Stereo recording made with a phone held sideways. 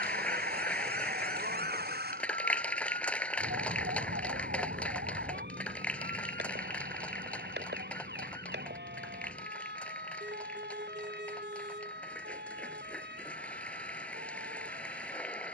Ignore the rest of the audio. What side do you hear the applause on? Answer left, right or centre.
centre.